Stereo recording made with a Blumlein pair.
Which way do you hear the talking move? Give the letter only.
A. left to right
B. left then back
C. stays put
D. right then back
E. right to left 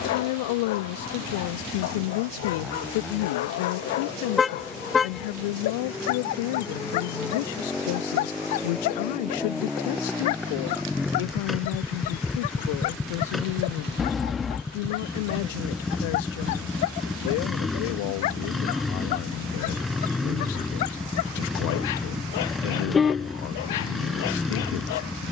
C.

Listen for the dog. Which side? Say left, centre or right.
left.